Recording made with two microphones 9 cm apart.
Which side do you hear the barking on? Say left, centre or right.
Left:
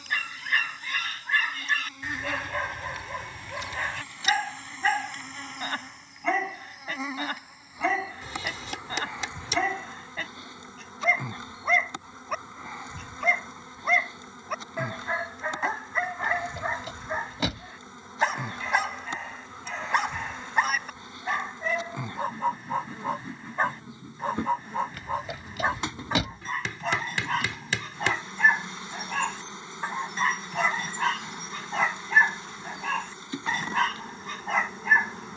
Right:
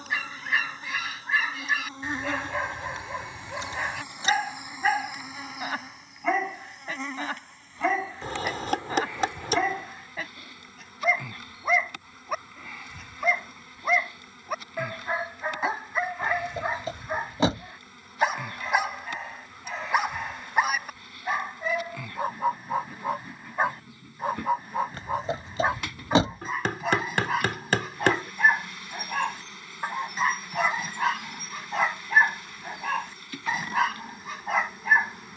centre.